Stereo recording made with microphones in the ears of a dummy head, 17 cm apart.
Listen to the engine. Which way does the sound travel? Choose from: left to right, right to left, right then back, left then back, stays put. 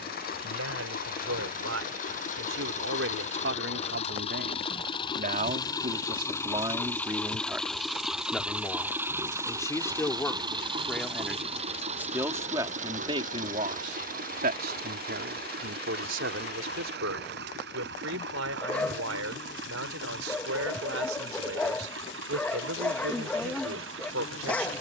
left to right.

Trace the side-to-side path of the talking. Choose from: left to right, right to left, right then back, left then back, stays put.
left then back.